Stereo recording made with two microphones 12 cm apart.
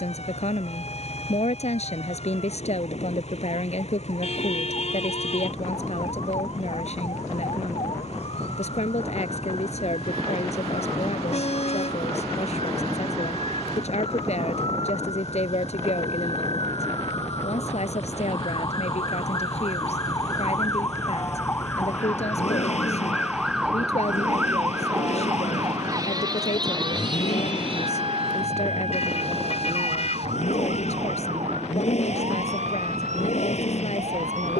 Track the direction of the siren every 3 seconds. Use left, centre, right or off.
left, left, left, left, left, left, left, centre, right, right, right, right.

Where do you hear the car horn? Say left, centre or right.
left.